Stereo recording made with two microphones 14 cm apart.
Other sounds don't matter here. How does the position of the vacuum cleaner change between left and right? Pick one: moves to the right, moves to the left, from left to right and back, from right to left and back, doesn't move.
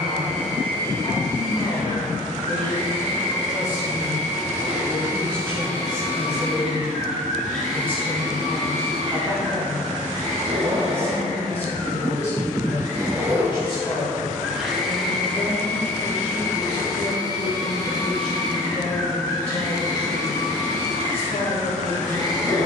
moves to the left.